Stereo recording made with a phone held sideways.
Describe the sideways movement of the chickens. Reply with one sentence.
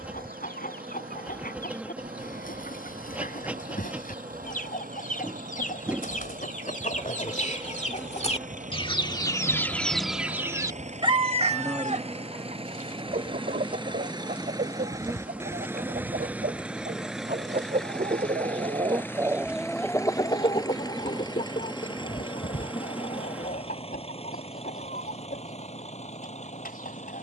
In this clip you hear the chickens go right and come back.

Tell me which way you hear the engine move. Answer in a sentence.
In this clip you hear the engine move to the left.